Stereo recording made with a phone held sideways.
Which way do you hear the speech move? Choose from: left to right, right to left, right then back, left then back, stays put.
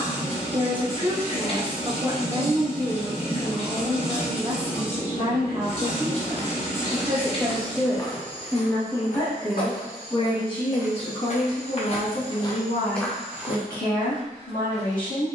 right to left.